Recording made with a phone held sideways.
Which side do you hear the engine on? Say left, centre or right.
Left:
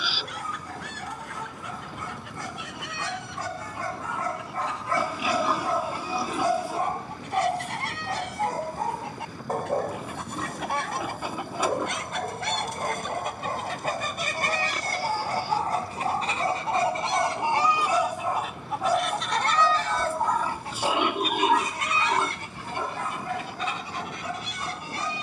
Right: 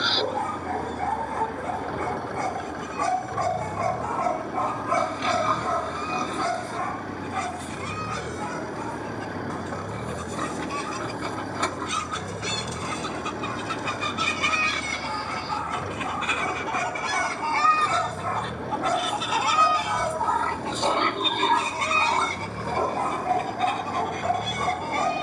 right.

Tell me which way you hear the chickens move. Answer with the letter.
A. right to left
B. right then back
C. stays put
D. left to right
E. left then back
D.